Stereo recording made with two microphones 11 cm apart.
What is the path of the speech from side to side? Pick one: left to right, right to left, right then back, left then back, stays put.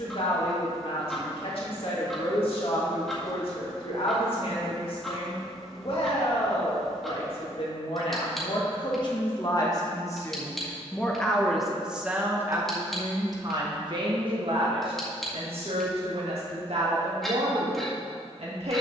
left to right.